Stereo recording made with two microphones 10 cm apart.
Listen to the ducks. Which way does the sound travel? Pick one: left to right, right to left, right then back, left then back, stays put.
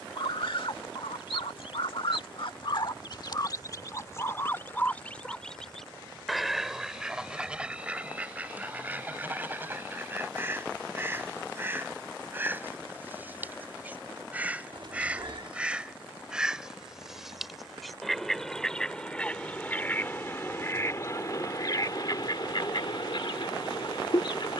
right then back.